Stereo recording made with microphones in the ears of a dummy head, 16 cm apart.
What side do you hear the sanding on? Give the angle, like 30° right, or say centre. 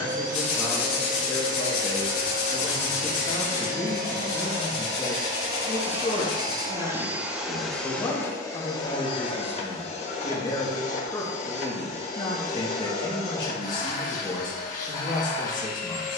60° left.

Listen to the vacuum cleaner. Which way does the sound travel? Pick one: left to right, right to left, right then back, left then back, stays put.
right to left.